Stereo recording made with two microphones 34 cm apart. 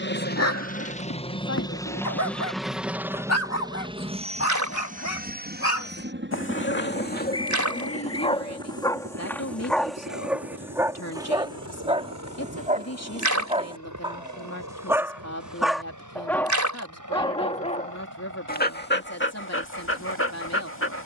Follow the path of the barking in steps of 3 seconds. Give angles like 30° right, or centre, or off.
50° left, 40° left, 20° left, centre, 20° right, 10° left, 30° left.